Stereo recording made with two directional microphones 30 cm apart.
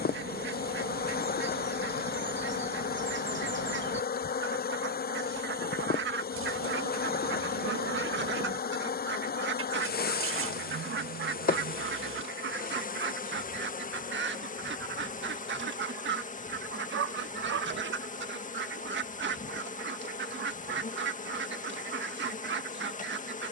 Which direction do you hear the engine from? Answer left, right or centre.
right.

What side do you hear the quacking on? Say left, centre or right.
right.